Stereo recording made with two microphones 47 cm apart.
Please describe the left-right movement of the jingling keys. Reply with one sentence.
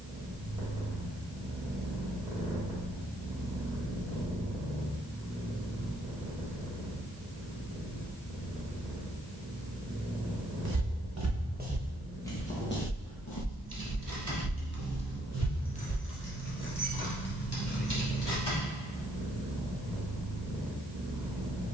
In this clip you hear the jingling keys move to the left.